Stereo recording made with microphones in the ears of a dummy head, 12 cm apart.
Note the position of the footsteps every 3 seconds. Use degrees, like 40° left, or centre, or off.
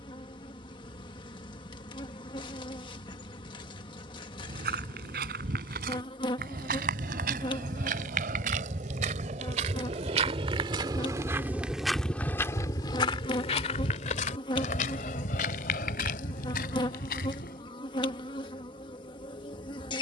off, 70° right, 70° right, 30° right, 40° left, 70° left, off.